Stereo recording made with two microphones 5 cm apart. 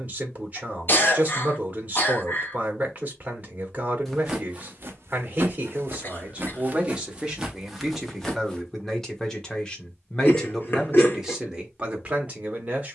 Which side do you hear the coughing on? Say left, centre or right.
left.